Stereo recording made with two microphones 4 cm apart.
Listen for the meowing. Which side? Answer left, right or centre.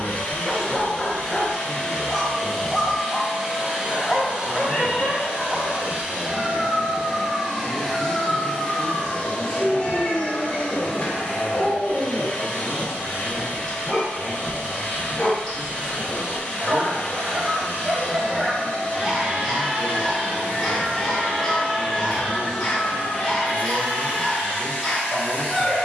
left.